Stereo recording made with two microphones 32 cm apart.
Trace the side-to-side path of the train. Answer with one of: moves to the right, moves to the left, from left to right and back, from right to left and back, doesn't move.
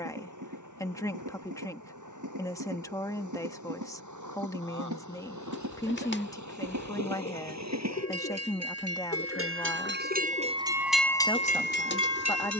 moves to the left.